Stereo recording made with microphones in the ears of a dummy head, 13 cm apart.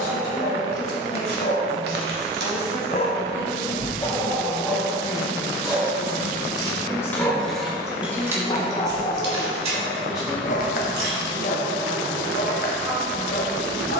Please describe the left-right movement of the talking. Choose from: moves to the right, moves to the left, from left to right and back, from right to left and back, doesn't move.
moves to the right.